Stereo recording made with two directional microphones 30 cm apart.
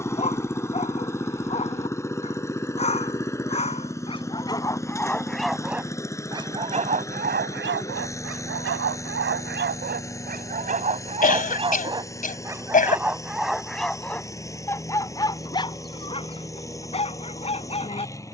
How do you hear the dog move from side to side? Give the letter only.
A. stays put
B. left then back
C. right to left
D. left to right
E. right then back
E.